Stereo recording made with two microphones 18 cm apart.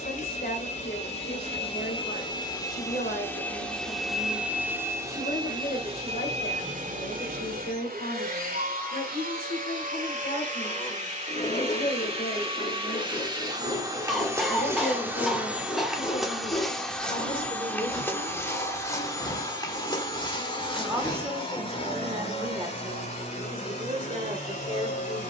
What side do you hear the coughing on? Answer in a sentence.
You can hear the coughing in the centre.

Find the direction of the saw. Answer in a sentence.
You can hear the saw on the left.